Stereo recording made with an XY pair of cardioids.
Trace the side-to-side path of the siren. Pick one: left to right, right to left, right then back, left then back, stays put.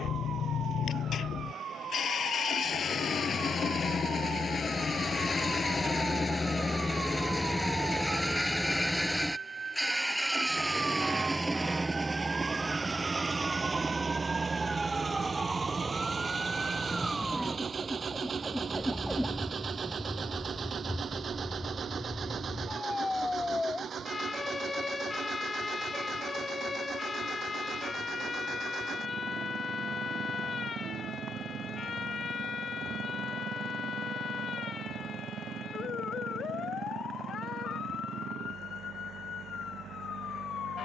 right to left.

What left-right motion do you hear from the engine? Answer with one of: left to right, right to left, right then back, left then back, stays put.
left to right.